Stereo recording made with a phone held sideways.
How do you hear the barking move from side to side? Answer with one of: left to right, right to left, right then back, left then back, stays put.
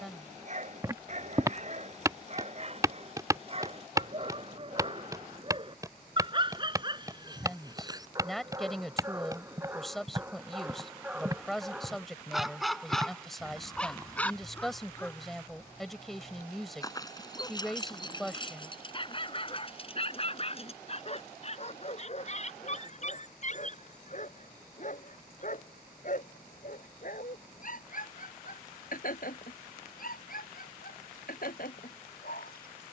right to left.